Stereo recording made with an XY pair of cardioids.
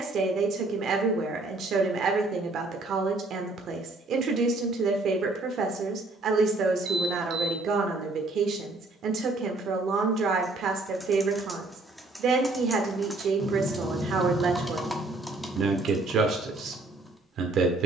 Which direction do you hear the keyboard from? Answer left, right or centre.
centre.